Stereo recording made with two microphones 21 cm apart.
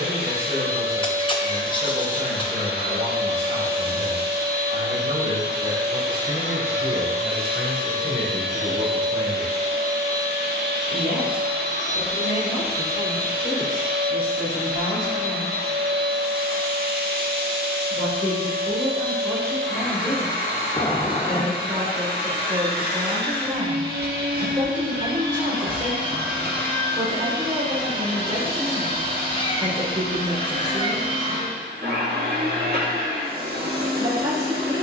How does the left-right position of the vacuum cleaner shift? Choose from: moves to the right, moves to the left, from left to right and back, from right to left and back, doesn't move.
doesn't move.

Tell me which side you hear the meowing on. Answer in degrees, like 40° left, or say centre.
20° left.